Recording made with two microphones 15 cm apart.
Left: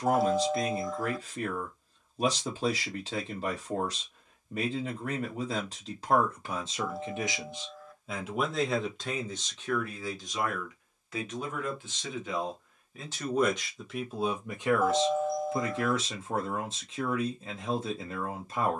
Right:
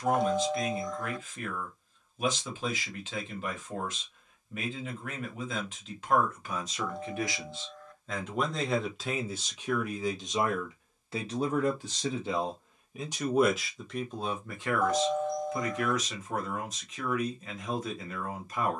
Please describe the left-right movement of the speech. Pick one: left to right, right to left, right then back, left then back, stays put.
right then back.